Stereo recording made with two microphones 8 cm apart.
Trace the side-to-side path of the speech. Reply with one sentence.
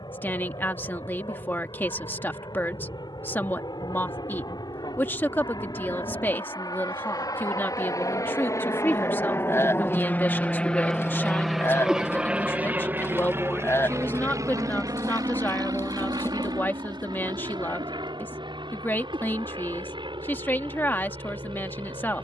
You can hear the speech stay put.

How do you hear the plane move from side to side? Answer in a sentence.
In this clip you hear the plane travel towards the right.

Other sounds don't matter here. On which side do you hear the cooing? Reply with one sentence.
You can hear the cooing on the left.